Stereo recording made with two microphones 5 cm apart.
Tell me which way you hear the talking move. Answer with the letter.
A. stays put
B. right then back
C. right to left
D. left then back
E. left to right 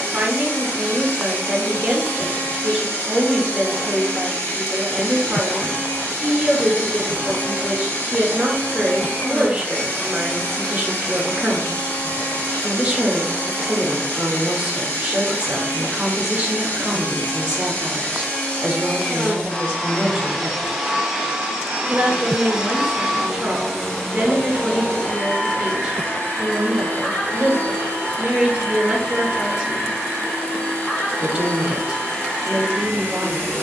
A.